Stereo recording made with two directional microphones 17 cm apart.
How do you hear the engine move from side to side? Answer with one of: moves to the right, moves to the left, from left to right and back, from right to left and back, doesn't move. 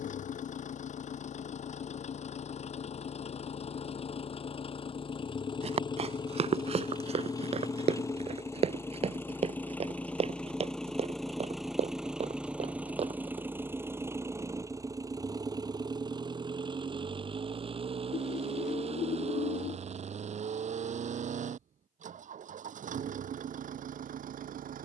moves to the right.